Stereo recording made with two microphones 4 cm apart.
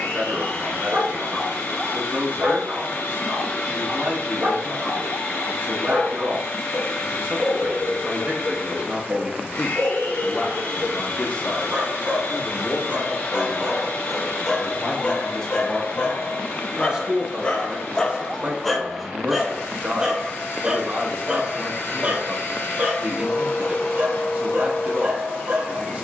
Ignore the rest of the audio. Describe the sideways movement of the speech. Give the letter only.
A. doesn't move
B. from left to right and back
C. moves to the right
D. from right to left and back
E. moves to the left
D.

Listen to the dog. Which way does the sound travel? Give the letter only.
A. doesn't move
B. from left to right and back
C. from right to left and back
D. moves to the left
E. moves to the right
C.